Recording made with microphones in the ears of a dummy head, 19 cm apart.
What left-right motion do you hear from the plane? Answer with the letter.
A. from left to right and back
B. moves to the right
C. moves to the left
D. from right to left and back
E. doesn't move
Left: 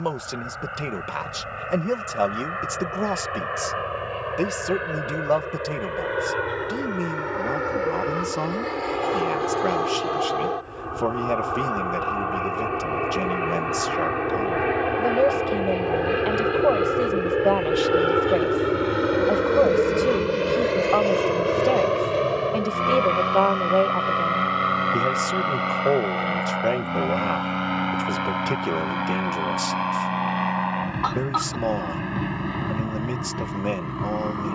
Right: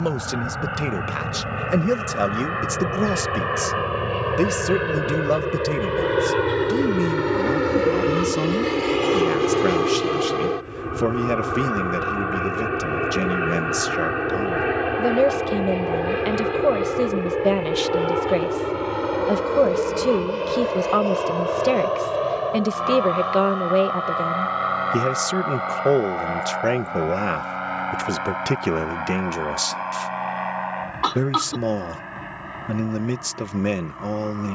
C.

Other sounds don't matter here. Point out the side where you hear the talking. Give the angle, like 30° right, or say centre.
30° right.